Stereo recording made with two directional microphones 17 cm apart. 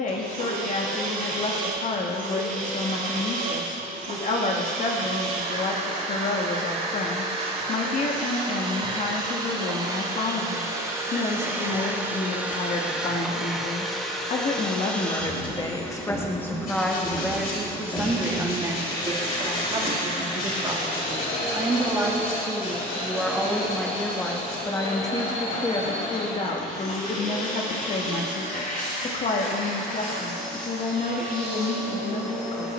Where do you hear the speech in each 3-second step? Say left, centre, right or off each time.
left, left, left, left, left, centre, right, centre, left, left, left.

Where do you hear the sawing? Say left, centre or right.
left.